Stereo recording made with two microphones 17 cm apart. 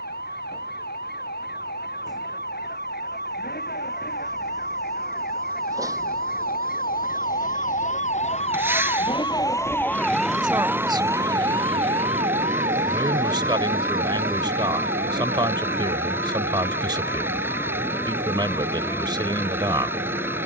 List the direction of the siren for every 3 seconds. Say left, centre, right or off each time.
left, left, left, centre, right, right, right.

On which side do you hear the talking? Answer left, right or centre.
right.